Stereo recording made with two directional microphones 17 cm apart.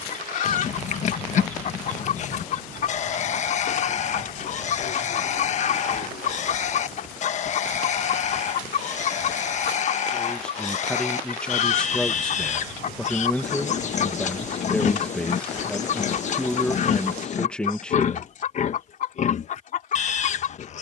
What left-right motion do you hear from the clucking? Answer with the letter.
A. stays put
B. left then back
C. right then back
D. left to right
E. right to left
A.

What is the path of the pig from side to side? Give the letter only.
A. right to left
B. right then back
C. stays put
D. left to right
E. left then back
C.